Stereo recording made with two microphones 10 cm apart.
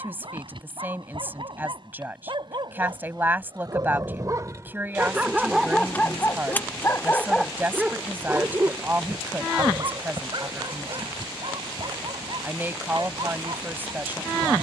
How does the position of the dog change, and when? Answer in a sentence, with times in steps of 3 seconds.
You can hear the dog on the right from 0 s, in the centre from 6 s and on the right from 9 s.